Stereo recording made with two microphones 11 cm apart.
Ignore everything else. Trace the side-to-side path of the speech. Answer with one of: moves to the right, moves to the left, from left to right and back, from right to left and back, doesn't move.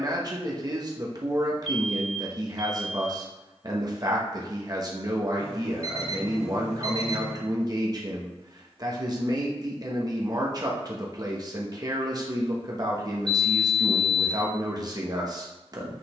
doesn't move.